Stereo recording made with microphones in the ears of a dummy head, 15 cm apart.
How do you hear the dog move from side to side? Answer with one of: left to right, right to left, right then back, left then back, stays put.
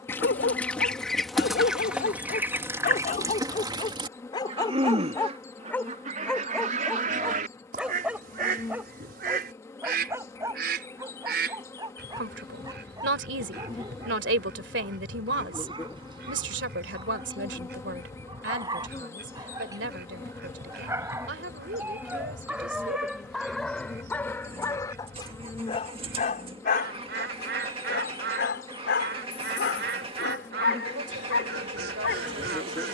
right then back.